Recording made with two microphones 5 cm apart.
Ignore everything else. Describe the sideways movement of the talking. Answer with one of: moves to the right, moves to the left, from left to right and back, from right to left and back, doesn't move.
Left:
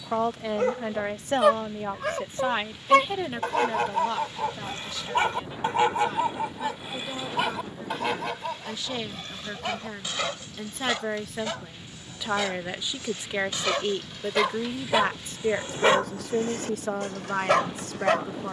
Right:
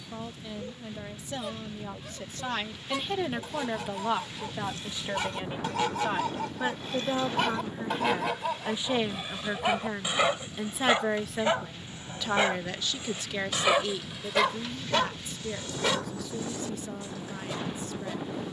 from left to right and back.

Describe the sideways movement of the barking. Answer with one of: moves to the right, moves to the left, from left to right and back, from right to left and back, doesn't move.
from left to right and back.